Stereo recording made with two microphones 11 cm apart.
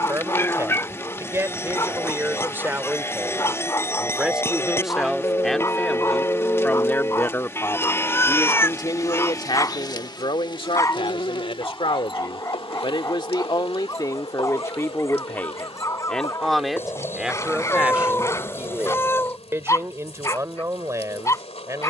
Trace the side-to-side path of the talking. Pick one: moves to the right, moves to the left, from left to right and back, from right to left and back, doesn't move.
from right to left and back.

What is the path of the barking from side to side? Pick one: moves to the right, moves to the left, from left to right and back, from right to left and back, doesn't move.
doesn't move.